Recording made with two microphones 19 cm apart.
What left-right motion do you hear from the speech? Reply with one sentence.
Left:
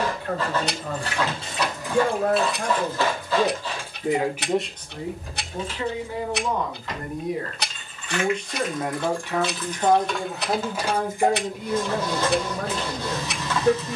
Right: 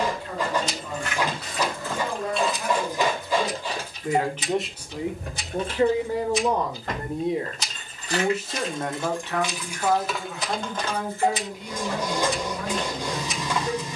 In this clip you hear the speech move from left to right and back again.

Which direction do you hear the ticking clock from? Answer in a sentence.
In this clip you hear the ticking clock on the left.